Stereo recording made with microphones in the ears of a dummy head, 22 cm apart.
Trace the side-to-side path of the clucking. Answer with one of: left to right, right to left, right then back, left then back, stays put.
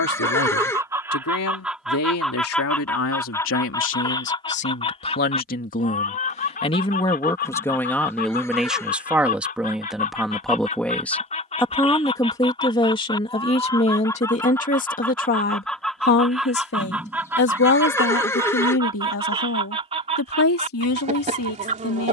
left then back.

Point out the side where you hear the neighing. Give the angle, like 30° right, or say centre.
10° left.